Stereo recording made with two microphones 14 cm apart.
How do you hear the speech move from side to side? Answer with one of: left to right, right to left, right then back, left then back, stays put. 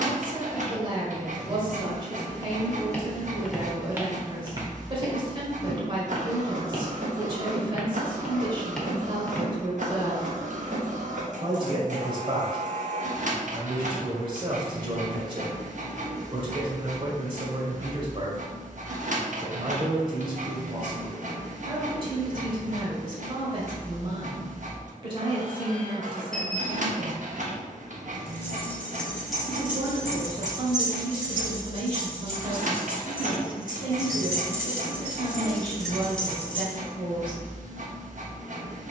stays put.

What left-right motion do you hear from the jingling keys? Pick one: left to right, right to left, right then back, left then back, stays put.
right then back.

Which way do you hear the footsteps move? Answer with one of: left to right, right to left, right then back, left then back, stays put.
right then back.